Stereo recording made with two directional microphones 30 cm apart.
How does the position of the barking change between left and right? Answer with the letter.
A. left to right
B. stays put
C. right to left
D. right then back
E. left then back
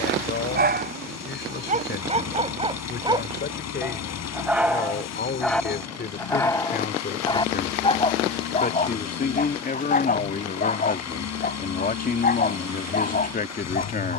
C.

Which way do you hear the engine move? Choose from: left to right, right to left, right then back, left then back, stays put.
stays put.